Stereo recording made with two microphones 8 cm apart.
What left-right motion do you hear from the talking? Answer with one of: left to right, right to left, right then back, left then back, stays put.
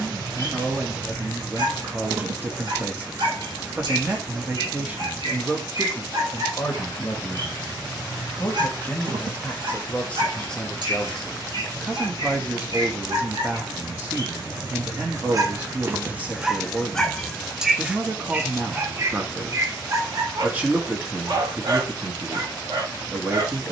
left then back.